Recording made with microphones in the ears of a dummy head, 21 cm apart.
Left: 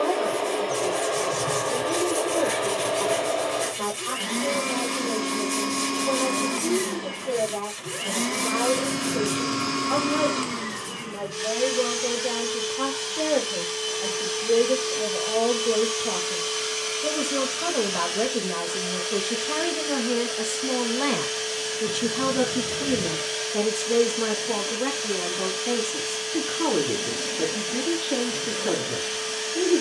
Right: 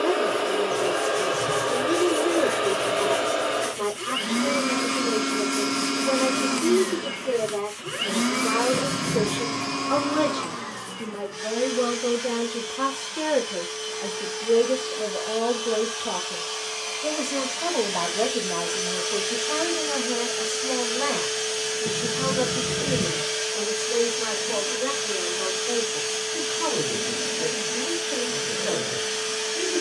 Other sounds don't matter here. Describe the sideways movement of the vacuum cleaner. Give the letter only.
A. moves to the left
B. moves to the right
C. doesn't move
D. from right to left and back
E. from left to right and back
D.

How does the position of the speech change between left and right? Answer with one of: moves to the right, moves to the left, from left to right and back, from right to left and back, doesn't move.
moves to the left.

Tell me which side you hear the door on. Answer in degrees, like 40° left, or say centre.
40° right.